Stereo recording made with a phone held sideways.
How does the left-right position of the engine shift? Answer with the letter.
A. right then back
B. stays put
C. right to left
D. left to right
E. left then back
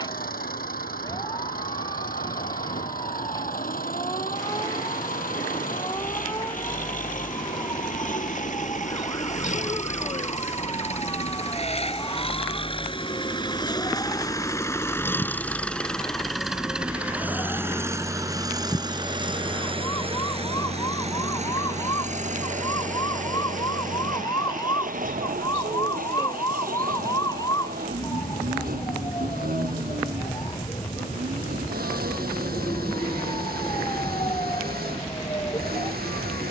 D.